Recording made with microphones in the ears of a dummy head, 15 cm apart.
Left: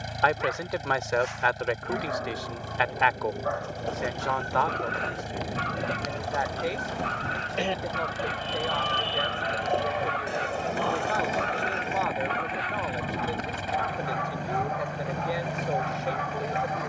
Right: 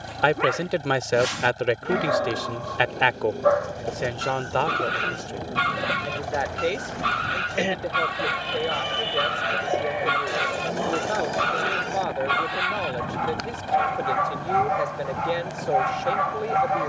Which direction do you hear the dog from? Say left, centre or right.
right.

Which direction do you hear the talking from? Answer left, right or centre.
right.